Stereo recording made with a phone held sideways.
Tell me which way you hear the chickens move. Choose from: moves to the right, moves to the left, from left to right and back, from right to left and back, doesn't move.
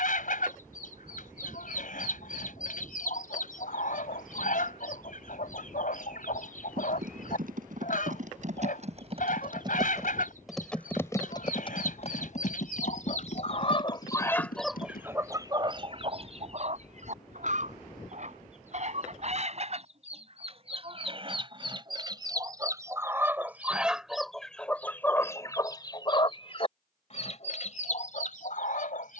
from left to right and back.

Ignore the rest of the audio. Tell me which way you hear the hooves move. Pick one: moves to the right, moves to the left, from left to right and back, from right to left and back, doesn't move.
moves to the left.